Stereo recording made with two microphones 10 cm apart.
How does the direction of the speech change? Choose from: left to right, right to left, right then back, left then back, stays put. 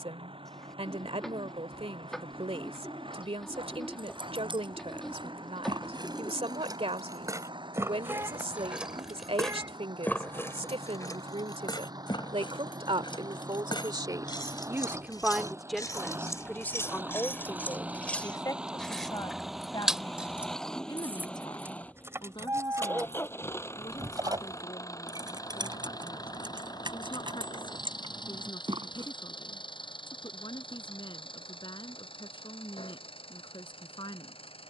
right to left.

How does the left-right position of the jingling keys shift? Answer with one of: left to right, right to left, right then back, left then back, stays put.
left then back.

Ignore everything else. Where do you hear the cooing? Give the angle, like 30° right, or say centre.
centre.